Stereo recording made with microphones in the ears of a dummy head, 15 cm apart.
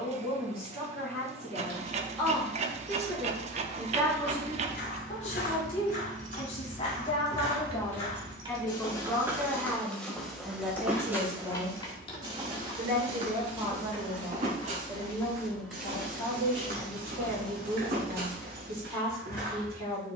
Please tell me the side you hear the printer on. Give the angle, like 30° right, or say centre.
40° right.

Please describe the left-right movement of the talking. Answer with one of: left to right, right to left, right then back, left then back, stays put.
left then back.